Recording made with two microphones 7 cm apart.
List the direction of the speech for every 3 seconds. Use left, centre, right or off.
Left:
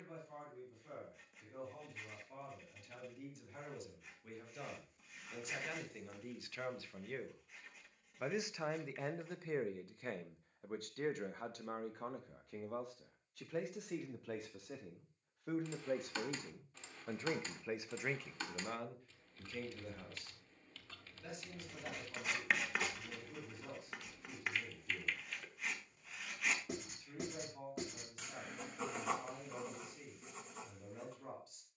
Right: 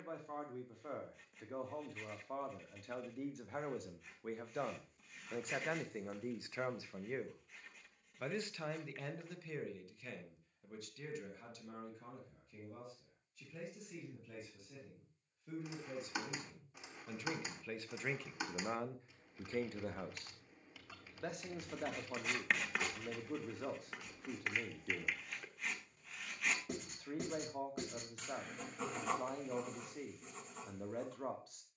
right, right, centre, left, left, left, right, right, right, right, right.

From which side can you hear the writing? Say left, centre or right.
centre.